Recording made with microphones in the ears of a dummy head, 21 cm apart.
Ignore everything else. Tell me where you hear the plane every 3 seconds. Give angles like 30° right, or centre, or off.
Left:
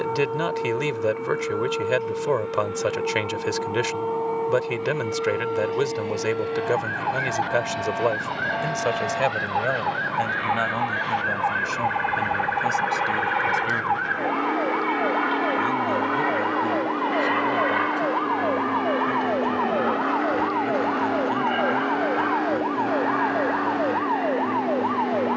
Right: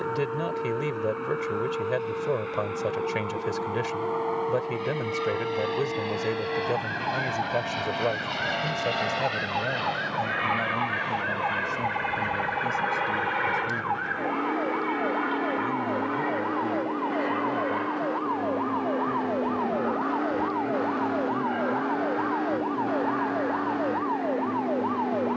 50° right, 50° right, 40° right, 20° right, centre, 40° left, 60° left, 70° left, 80° left.